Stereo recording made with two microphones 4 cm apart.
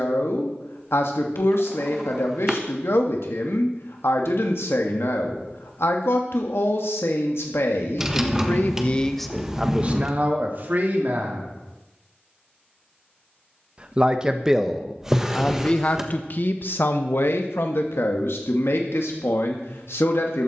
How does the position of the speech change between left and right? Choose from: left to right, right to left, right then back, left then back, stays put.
right then back.